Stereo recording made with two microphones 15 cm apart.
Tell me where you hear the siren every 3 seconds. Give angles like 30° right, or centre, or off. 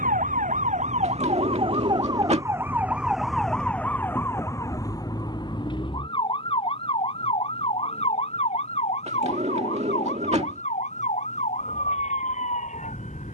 40° right, 20° left, 40° left, 50° left, 50° left.